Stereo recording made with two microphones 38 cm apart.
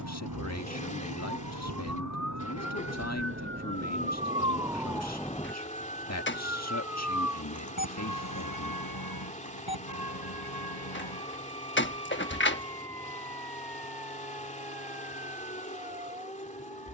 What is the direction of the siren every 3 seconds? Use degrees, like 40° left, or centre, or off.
50° right, 10° right, 50° left, 70° left, 80° left, 80° left.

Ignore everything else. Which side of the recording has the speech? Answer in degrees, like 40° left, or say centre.
40° left.